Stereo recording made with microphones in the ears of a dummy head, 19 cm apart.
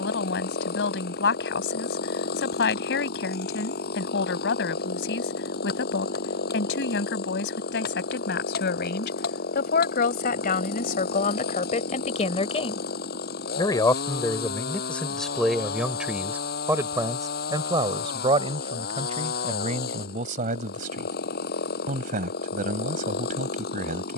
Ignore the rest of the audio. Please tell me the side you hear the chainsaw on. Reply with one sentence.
You can hear the chainsaw on the left.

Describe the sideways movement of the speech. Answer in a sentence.
You can hear the speech move from left to right.